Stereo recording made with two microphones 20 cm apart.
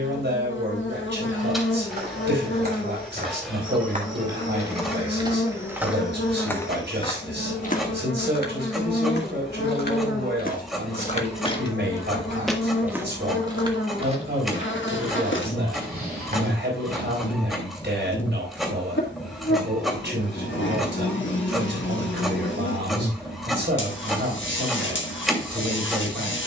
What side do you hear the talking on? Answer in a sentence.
In this clip you hear the talking on the right.